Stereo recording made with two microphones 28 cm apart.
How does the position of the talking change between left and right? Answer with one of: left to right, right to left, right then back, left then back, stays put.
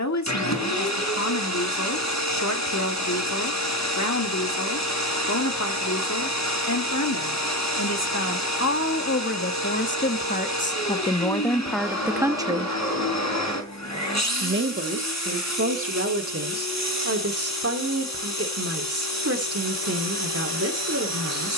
left to right.